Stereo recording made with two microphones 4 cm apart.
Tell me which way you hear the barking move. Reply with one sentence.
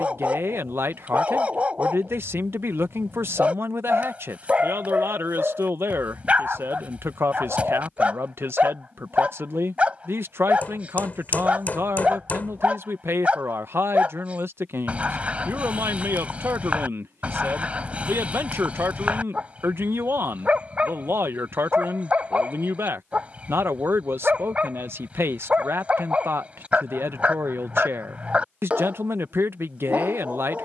You can hear the barking stay in one place.